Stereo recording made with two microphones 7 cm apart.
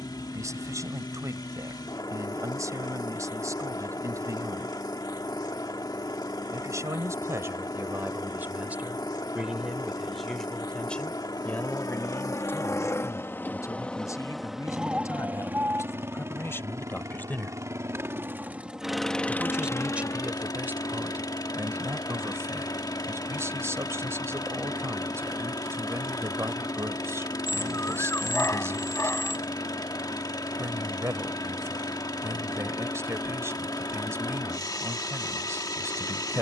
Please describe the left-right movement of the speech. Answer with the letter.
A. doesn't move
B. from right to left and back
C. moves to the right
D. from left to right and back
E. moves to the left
B.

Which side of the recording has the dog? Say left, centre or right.
left.